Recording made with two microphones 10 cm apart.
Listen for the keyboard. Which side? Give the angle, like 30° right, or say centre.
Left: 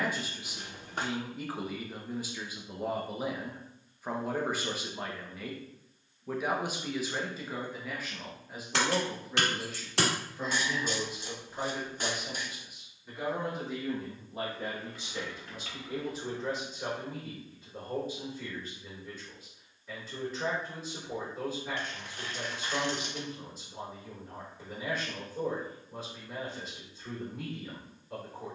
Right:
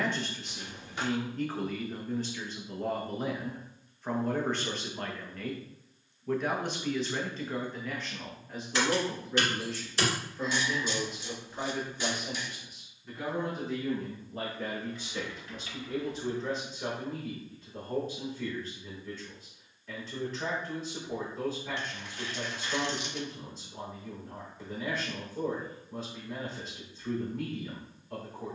80° left.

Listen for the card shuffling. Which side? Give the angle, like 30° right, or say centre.
50° left.